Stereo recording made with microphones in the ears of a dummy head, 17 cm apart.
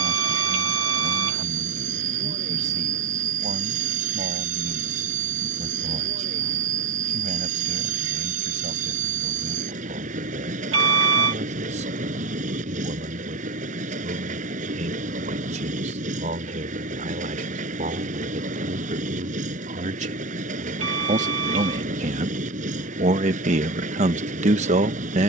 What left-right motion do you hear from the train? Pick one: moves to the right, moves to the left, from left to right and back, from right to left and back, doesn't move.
doesn't move.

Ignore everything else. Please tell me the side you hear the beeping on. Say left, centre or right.
right.